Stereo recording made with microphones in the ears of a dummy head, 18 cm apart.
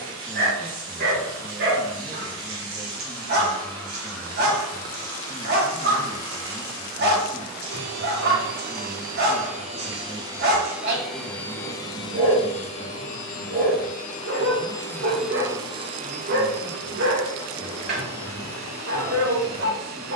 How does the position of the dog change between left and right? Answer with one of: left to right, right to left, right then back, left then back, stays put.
stays put.